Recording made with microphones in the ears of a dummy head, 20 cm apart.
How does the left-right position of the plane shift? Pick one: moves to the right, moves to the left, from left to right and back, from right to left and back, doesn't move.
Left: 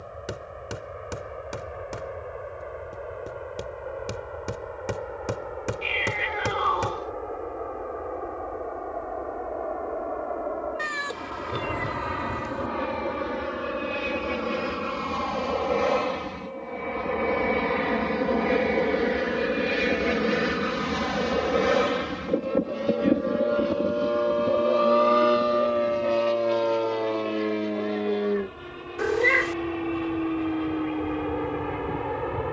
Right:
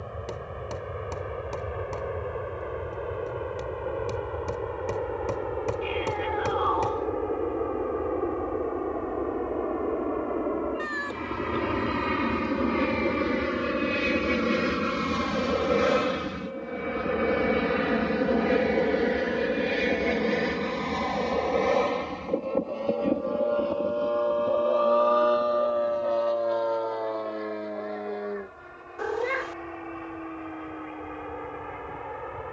moves to the left.